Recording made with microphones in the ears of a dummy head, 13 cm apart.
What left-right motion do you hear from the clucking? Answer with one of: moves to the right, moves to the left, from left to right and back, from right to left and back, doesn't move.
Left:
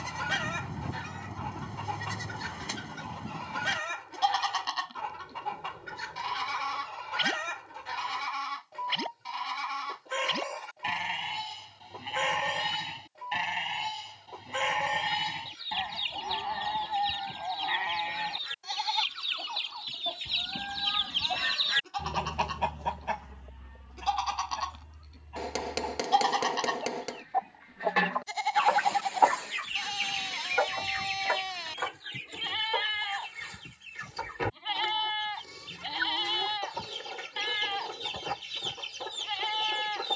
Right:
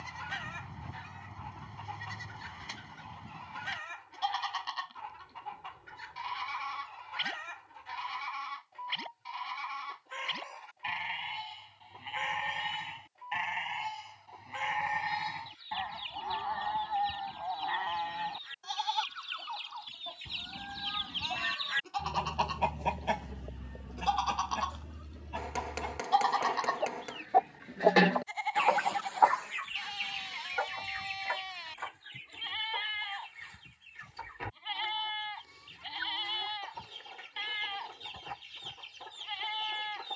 from left to right and back.